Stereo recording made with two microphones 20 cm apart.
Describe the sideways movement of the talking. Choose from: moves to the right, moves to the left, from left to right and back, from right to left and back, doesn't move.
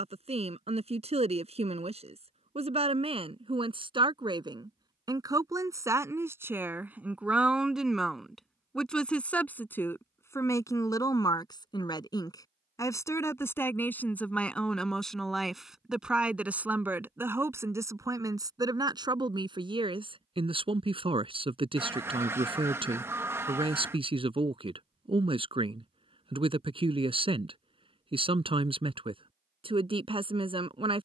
from right to left and back.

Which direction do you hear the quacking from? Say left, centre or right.
centre.